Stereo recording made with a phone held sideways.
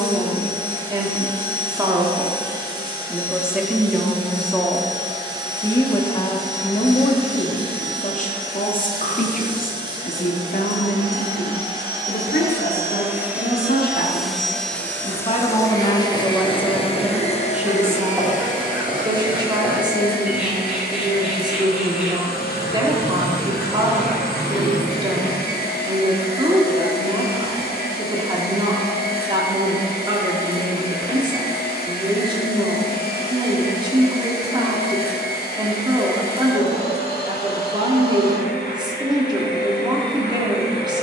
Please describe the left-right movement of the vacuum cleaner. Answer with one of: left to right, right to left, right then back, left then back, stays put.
right to left.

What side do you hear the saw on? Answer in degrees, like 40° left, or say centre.
10° right.